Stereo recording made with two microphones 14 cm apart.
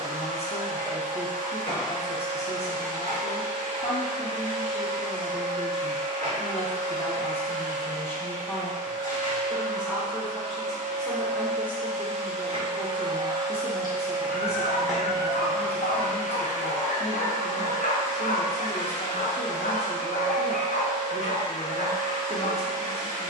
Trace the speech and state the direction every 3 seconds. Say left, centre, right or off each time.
left, left, left, centre, left, left, left, left.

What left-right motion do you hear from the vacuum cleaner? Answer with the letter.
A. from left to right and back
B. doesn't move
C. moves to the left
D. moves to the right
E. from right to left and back
C.